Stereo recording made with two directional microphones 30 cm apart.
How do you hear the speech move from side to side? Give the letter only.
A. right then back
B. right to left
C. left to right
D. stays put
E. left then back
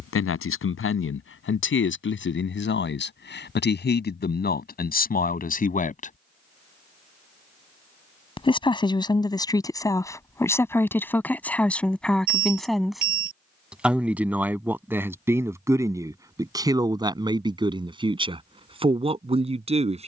C.